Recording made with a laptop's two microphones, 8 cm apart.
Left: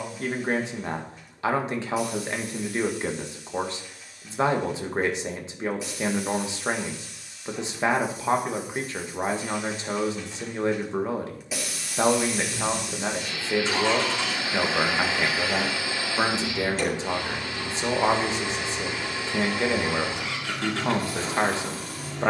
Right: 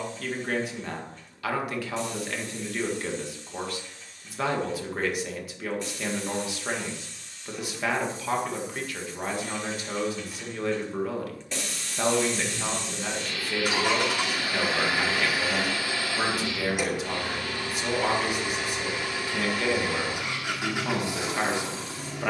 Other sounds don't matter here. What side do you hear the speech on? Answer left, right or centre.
left.